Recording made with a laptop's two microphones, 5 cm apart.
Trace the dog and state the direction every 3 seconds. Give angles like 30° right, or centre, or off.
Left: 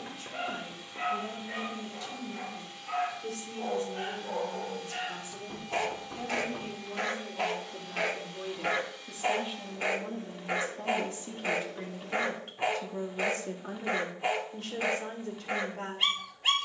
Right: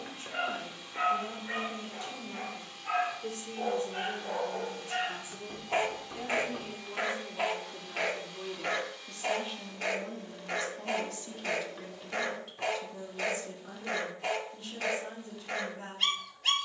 60° right, 40° right, 10° right, 20° left, 20° left, 20° left.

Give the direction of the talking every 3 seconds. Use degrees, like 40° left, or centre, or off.
40° right, 30° right, 10° right, 20° left, 50° left, 60° left.